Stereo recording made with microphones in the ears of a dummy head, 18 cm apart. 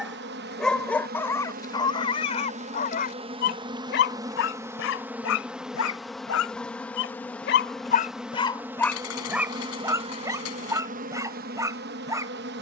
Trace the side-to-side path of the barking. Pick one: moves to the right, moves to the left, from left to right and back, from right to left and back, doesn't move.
from right to left and back.